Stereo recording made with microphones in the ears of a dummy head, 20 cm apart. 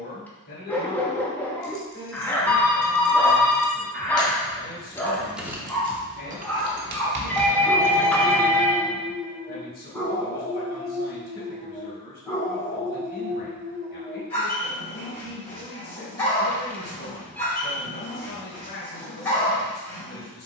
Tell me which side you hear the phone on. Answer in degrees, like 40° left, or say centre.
10° left.